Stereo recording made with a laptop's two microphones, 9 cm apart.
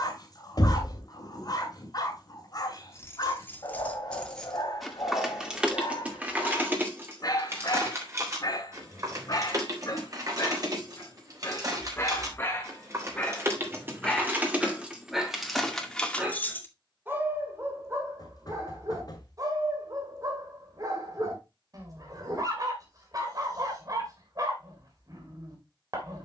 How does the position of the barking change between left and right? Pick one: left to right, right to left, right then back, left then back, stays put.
left to right.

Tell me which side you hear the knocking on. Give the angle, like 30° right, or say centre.
50° left.